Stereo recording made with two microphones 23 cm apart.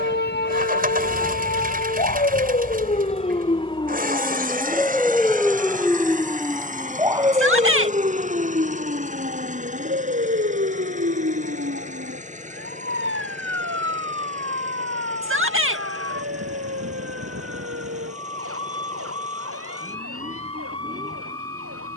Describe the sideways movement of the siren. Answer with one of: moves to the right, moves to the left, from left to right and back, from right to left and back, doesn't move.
moves to the right.